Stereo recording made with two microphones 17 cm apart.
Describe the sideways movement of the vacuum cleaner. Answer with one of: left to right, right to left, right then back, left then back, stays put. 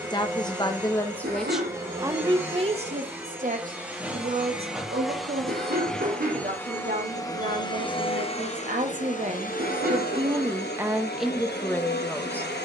right to left.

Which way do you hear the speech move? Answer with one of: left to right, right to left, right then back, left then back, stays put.
right then back.